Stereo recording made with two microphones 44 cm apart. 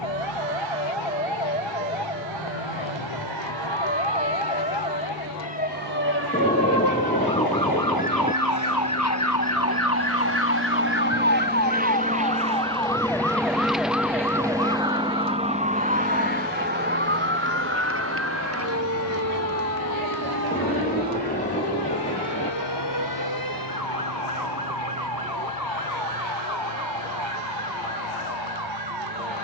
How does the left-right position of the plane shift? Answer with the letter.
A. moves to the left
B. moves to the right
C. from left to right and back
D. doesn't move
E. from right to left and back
A.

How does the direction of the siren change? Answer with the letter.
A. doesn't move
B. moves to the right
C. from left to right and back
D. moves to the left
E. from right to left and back
B.